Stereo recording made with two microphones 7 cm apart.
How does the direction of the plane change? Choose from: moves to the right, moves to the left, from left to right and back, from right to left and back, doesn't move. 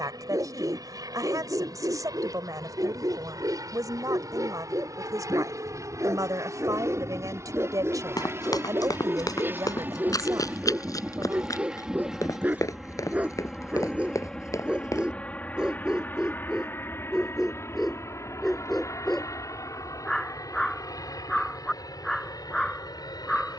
moves to the left.